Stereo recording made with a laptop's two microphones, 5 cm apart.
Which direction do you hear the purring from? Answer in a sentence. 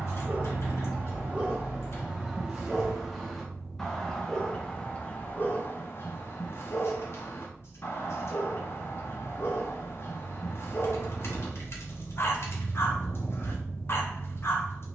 You can hear the purring on the left.